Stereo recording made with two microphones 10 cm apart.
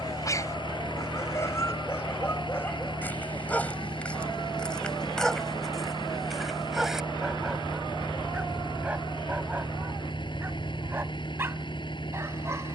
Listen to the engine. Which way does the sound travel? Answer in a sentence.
In this clip you hear the engine stay put.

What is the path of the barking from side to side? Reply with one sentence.
In this clip you hear the barking move to the right.